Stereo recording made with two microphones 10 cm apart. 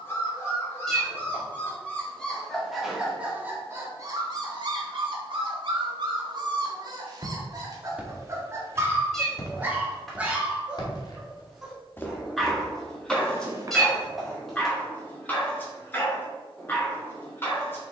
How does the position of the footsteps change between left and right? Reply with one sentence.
You can hear the footsteps move from right to left and back again.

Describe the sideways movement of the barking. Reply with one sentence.
In this clip you hear the barking go right and come back.